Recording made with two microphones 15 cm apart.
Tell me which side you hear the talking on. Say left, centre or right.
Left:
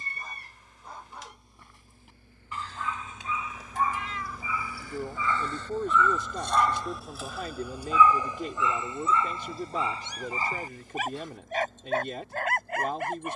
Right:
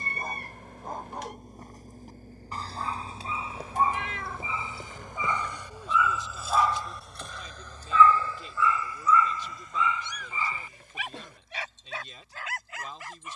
left.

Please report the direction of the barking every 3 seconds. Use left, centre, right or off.
right, right, centre, left, left.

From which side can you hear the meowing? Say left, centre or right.
right.